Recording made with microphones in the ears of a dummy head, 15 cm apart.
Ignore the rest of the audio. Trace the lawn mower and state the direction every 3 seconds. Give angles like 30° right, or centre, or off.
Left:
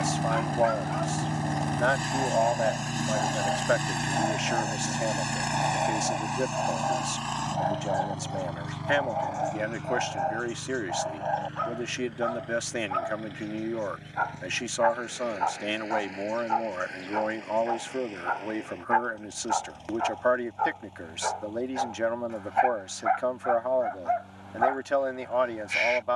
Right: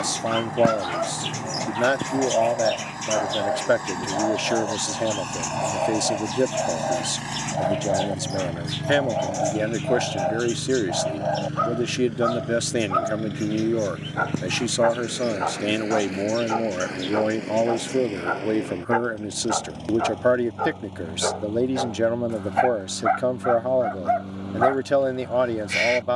30° left, 20° left, 10° right, 40° right, 50° right, 60° right, 60° right, 70° right, 70° right.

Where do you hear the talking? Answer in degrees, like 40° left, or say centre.
40° right.